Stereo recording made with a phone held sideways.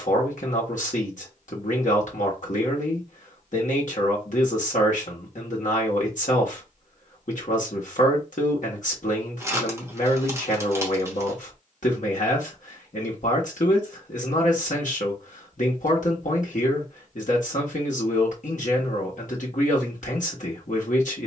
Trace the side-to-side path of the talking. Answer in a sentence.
In this clip you hear the talking stay in one place.